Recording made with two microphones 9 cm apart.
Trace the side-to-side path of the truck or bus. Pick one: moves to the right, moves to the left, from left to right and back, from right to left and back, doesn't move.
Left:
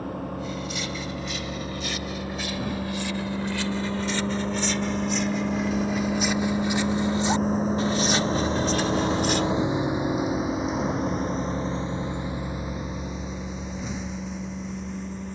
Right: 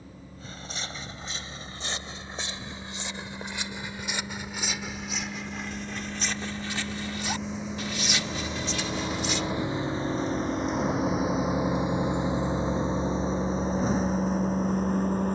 moves to the right.